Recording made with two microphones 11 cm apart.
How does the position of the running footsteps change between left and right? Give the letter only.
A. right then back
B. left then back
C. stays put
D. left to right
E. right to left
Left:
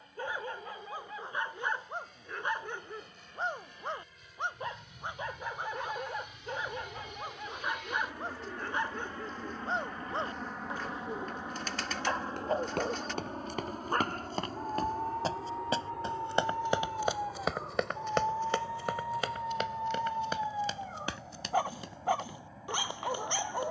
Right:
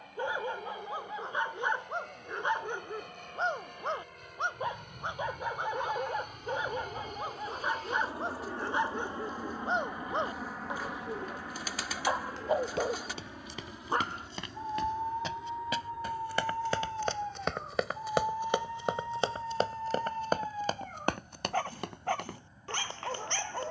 D.